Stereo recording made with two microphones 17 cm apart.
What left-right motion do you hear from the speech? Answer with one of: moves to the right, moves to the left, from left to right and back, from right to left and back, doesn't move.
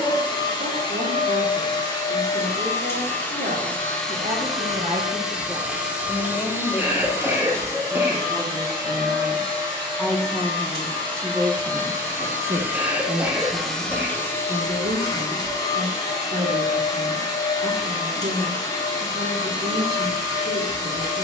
from right to left and back.